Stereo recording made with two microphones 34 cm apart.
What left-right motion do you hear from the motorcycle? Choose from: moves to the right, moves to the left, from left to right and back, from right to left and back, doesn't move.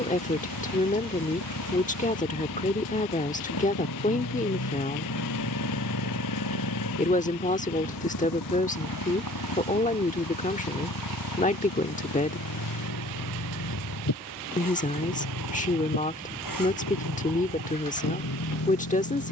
doesn't move.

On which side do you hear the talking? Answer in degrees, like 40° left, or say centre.
20° left.